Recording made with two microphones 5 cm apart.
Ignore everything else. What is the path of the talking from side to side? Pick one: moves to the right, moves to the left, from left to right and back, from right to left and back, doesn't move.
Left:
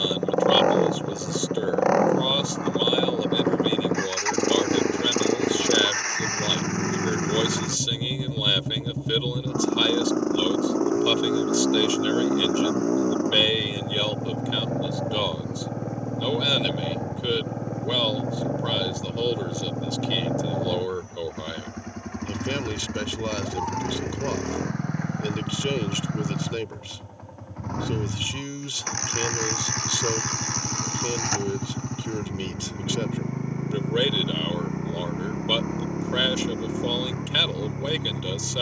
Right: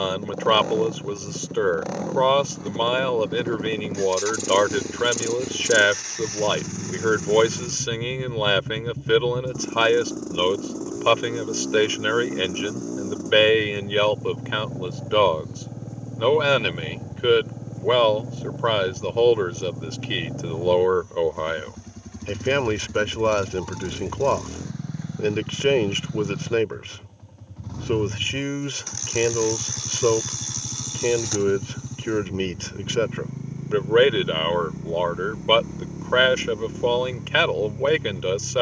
doesn't move.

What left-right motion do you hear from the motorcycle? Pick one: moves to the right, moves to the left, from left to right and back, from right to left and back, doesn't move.
doesn't move.